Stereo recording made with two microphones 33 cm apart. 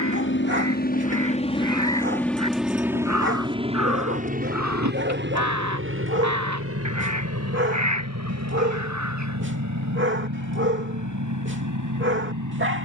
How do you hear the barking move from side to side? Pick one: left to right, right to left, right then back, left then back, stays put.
stays put.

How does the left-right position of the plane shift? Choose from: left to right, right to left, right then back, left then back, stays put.
left to right.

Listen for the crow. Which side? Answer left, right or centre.
right.